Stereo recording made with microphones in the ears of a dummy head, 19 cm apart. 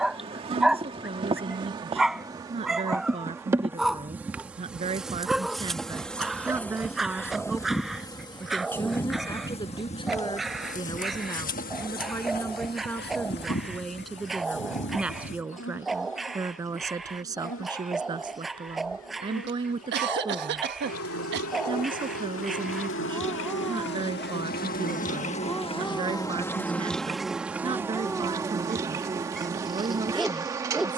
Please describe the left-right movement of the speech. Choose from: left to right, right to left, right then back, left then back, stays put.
left then back.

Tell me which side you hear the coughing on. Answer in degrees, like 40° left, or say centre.
60° right.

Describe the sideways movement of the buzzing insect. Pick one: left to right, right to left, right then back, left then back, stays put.
left then back.